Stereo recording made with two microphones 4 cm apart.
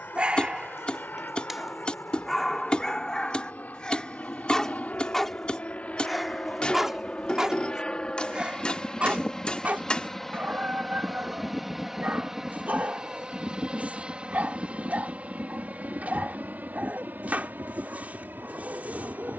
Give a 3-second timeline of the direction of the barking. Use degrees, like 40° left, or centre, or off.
10° right, 10° left, 20° right, 40° right, 40° right, 40° right, 40° right.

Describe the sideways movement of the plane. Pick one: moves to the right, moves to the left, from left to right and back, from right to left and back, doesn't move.
moves to the right.